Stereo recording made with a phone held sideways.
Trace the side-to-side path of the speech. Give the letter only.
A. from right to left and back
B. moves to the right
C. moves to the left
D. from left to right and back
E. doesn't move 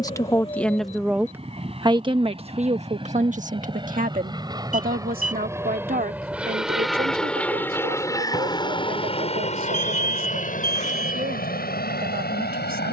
B.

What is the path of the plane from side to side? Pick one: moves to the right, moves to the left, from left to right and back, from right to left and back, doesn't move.
moves to the left.